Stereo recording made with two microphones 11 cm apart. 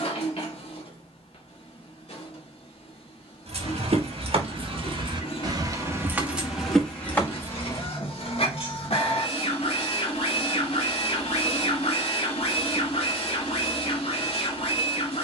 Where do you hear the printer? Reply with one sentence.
In this clip you hear the printer on the left.